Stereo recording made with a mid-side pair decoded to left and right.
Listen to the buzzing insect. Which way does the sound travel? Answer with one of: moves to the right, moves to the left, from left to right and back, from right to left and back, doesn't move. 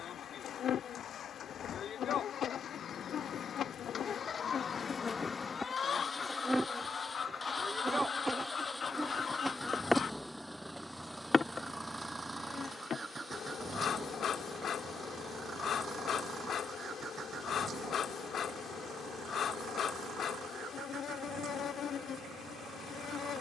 from left to right and back.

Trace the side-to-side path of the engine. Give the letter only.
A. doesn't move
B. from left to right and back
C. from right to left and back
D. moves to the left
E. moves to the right
E.